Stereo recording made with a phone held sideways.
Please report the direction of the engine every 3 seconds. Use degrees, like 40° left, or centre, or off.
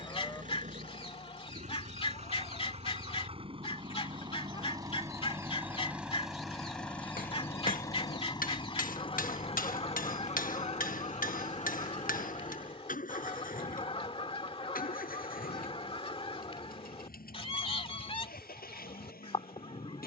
50° right, 30° right, 20° left, 50° left, 60° left, 70° left, 80° left.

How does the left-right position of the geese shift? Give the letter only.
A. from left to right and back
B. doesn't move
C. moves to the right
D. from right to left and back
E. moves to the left
B.